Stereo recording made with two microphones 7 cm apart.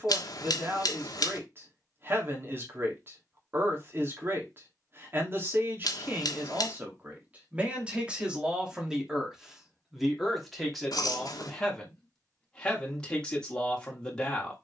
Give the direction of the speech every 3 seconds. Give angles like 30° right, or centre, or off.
40° right, 40° right, 20° right, centre, 10° left.